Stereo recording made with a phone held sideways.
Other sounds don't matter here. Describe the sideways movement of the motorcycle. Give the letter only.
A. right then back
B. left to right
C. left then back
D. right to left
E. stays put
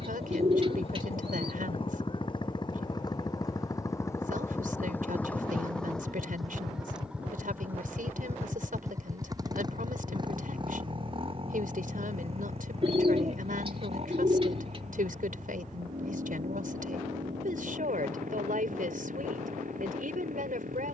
B.